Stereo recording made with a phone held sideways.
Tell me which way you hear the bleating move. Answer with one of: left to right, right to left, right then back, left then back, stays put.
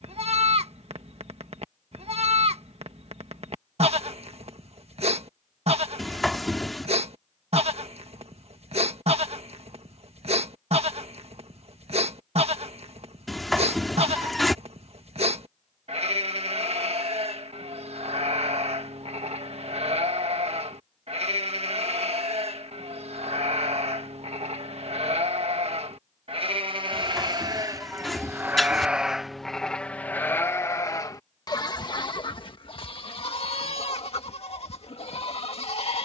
right to left.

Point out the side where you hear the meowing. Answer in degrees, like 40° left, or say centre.
centre.